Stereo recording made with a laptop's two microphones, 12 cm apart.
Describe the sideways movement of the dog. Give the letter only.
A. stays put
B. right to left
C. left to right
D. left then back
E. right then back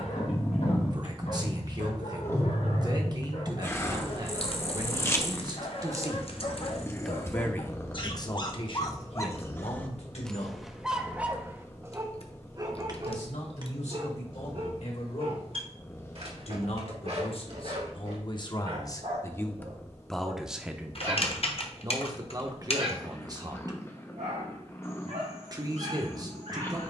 C.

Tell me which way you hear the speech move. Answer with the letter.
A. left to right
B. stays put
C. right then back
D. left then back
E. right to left
D.